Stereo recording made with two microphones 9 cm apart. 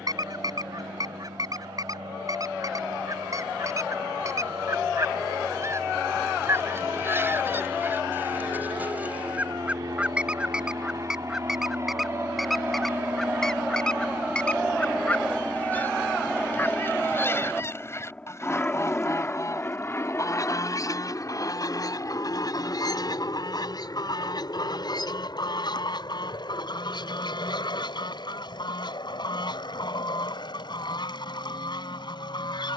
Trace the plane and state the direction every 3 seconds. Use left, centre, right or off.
right, right, right, right, right, centre, left, left, left, left, left.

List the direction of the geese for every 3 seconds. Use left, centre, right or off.
right, right, right, centre, centre, left, left, left, left, left, left.